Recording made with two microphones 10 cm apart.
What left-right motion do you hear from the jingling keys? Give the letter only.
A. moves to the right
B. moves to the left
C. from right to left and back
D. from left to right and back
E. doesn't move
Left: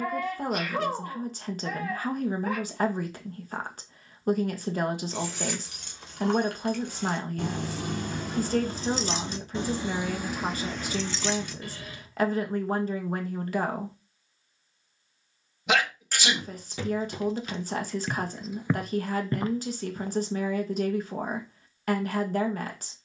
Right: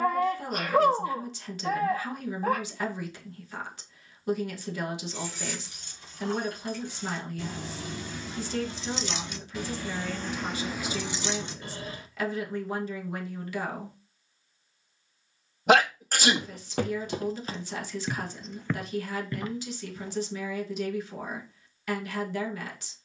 A.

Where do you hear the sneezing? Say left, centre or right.
right.